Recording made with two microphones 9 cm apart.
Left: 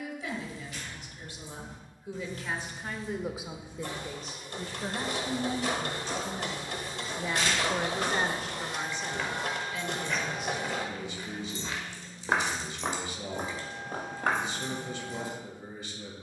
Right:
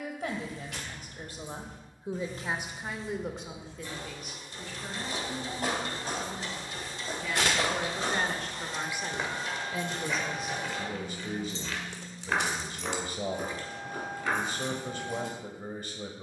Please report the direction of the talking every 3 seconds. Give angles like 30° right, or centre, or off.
40° right, 40° left, 20° left, 40° right, 50° right, 50° right.